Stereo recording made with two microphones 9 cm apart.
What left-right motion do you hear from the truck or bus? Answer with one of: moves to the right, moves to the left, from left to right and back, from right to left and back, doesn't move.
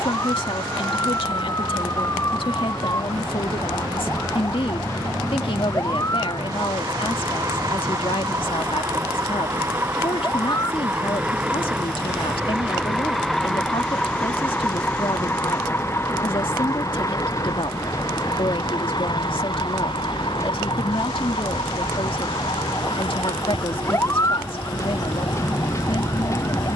moves to the left.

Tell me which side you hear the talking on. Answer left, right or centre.
left.